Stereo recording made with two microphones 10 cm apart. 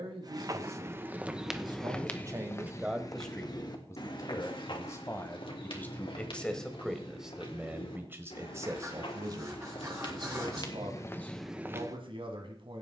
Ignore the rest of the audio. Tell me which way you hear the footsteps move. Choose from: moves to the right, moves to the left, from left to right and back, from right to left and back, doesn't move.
from right to left and back.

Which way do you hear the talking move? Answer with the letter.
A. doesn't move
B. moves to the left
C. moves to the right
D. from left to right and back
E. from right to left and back
E.